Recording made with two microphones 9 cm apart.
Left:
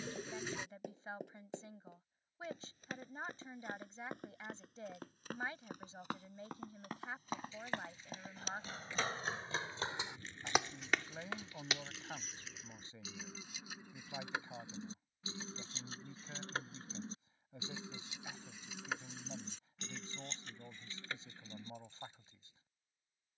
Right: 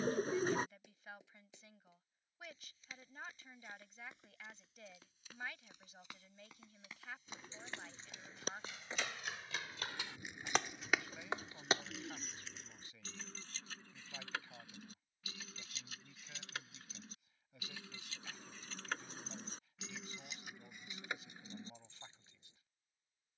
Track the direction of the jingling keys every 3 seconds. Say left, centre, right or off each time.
off, off, right, centre, centre, left, centre, right.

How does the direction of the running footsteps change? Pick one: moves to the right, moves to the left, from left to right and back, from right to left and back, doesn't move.
moves to the right.